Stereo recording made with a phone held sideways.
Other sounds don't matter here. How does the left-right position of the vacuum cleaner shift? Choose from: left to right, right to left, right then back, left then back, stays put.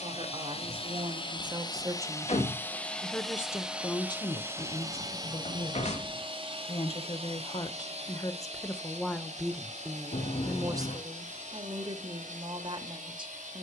left to right.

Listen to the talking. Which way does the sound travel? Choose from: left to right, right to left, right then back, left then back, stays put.
left then back.